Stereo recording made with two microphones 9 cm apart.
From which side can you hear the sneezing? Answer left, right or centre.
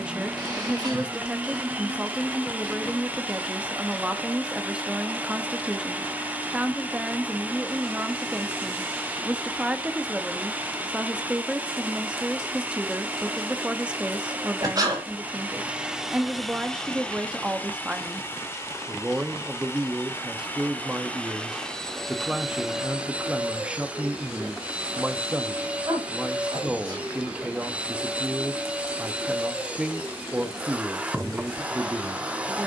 right.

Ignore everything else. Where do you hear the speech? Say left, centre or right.
centre.